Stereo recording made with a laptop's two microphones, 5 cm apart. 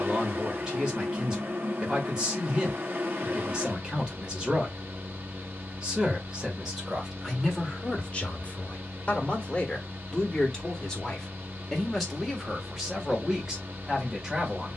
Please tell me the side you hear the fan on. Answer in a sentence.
You can hear the fan on the right.